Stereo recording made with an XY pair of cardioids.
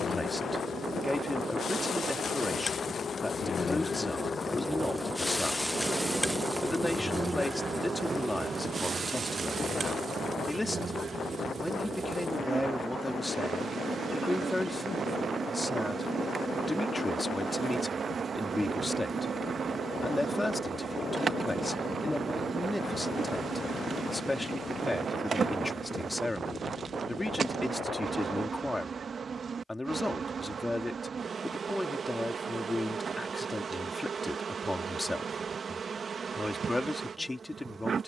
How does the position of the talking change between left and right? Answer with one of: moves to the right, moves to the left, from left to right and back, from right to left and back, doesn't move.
doesn't move.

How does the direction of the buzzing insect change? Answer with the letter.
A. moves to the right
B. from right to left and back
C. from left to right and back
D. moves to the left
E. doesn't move
A.